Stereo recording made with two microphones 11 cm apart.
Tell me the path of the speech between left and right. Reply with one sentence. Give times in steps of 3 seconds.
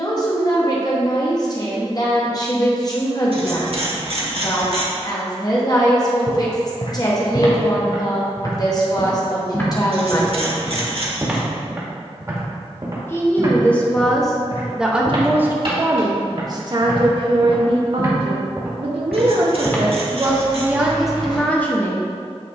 In this clip you hear the speech on the left from 0 s, in the centre from 12 s, on the right from 15 s and in the centre from 21 s.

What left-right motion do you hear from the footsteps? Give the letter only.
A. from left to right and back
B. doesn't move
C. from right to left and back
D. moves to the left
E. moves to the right
A.